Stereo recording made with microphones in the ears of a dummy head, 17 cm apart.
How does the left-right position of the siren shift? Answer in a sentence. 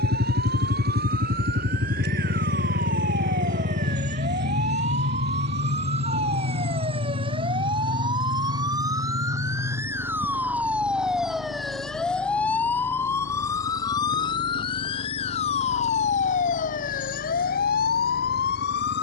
You can hear the siren move from right to left.